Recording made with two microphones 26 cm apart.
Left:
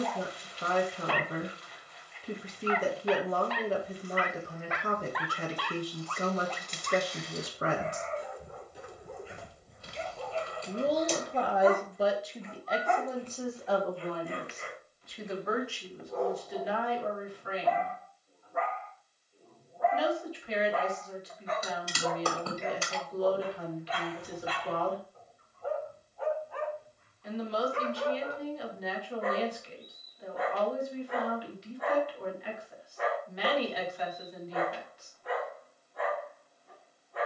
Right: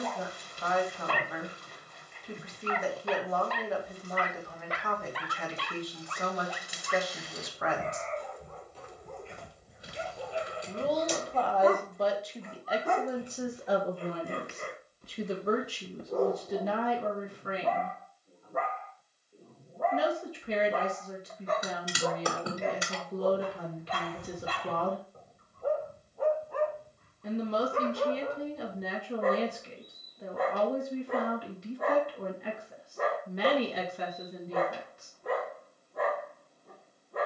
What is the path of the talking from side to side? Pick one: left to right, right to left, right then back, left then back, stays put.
left to right.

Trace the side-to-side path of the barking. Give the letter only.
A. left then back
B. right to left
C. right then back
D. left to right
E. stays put
A.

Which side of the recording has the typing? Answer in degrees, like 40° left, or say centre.
20° right.